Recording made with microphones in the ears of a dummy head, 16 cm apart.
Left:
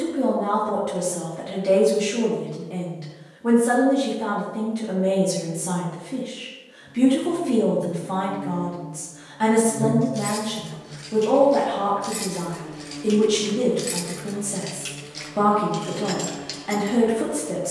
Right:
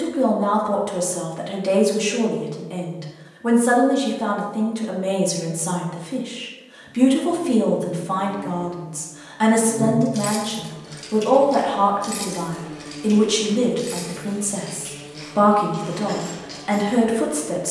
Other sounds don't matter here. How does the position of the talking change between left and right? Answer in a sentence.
You can hear the talking stay put.